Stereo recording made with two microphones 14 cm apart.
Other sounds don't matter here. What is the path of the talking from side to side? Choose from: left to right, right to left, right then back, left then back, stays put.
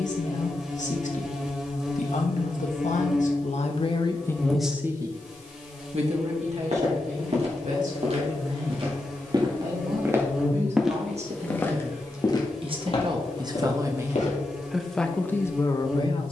right then back.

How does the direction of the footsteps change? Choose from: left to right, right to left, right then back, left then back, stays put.
right to left.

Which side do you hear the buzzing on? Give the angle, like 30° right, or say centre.
10° right.